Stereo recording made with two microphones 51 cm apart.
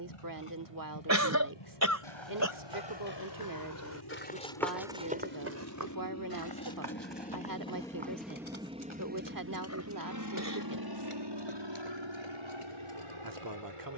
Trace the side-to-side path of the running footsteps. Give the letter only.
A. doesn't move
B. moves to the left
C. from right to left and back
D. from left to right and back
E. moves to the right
E.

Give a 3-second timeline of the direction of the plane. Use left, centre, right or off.
left, left, centre, right, right.